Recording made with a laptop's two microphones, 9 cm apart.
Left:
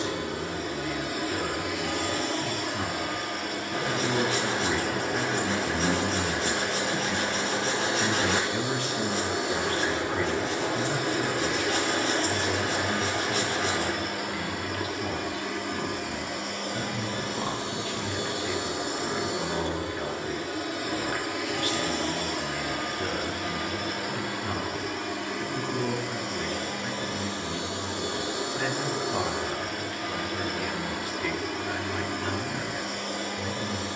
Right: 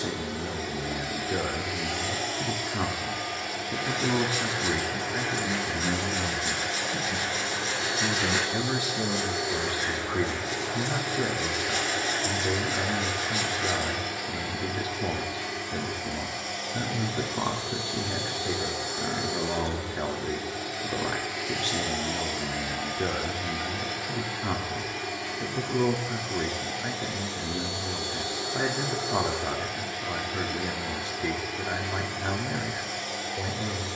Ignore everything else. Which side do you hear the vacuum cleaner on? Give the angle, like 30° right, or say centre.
60° left.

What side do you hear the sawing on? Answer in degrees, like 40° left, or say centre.
70° left.